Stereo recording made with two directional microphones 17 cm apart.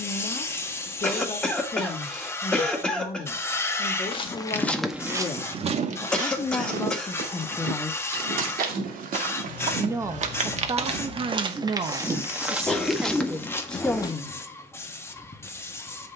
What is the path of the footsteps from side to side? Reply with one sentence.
You can hear the footsteps move from left to right and back again.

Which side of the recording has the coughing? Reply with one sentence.
In this clip you hear the coughing in the centre.